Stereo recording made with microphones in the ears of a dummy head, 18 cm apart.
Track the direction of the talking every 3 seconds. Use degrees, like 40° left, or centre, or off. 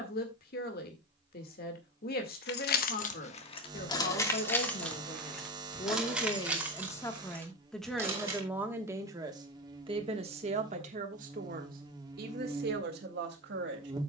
50° left, 40° left, 10° left, 30° right, 50° right.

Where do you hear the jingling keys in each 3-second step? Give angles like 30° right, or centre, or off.
50° left, 20° left, 10° right, off, off.